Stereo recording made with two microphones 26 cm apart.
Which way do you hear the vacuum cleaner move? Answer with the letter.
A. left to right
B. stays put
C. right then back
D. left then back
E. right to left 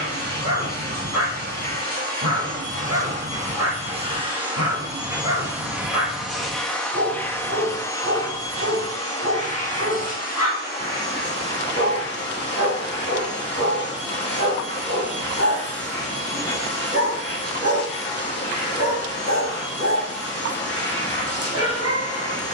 E.